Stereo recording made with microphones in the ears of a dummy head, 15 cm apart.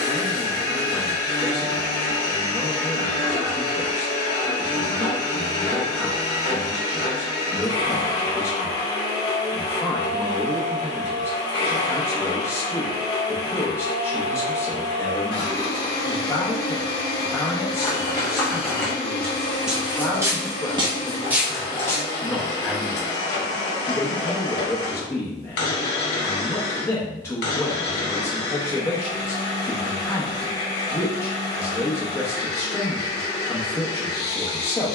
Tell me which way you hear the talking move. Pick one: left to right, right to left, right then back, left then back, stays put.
stays put.